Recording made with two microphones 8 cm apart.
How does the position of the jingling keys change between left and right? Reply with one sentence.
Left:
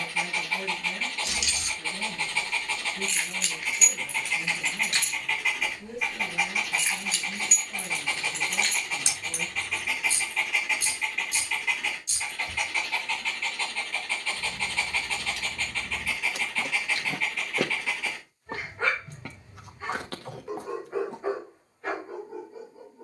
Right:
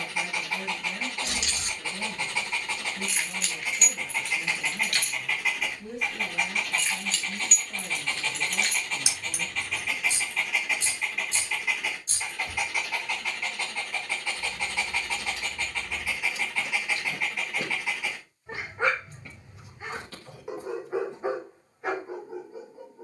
In this clip you hear the jingling keys move from right to left and back again.